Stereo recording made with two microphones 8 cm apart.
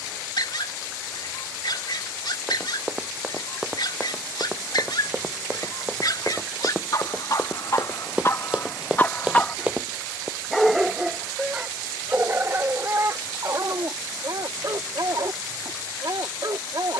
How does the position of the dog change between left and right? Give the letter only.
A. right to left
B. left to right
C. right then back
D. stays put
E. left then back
B.